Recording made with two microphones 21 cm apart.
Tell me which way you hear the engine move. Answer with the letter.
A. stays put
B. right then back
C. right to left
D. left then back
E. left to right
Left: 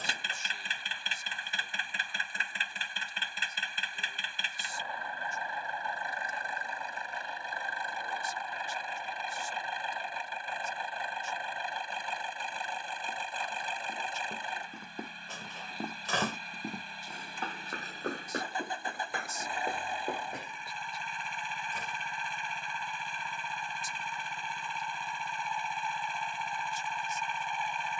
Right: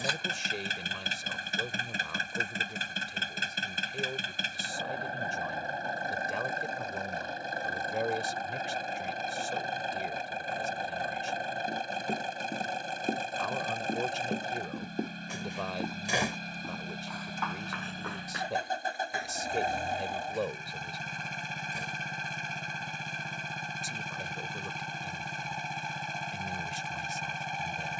A.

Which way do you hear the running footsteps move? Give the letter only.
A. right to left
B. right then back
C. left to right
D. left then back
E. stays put
A.